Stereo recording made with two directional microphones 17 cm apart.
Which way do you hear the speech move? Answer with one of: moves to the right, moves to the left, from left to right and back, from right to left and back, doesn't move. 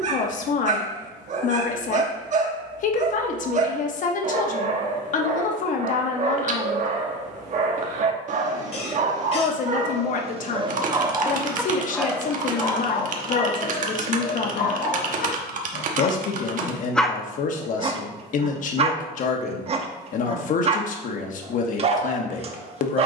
doesn't move.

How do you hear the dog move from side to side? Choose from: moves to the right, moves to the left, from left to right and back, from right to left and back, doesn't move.
from right to left and back.